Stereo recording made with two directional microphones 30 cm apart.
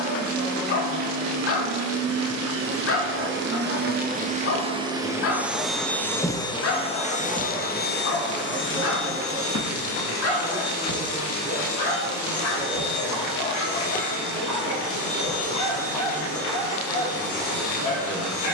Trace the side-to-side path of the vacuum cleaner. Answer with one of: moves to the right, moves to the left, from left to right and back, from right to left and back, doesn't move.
moves to the left.